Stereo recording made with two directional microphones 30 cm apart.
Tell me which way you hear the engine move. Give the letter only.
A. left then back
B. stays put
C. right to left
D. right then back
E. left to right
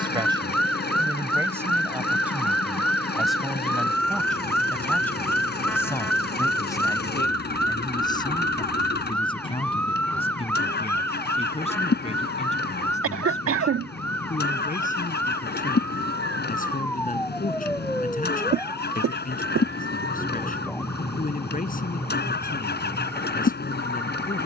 B.